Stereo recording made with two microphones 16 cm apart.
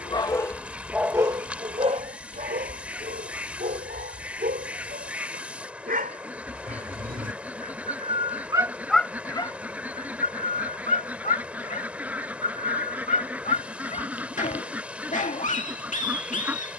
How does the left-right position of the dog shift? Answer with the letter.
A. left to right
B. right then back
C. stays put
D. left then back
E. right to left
B.